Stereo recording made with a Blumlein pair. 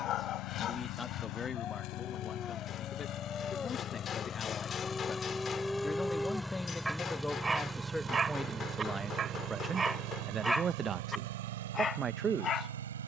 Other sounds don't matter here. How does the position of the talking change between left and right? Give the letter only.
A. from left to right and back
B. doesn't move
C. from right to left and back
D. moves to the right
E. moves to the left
D.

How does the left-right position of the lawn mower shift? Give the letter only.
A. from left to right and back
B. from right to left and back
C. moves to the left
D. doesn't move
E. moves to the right
E.